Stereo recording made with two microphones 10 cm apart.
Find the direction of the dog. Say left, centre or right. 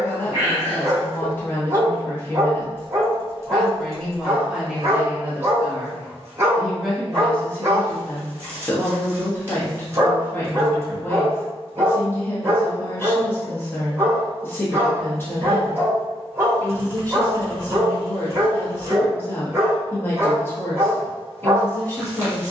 right.